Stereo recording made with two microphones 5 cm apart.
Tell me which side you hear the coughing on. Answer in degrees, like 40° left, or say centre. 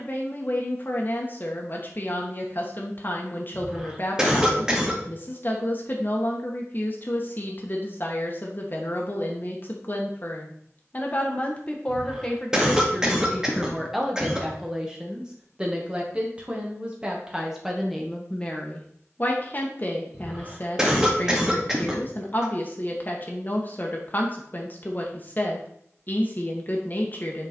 10° right.